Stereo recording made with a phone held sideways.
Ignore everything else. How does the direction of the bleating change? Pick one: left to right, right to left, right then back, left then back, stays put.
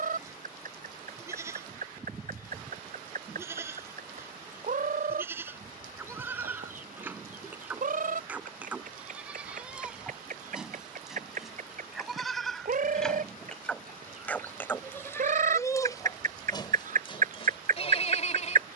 right to left.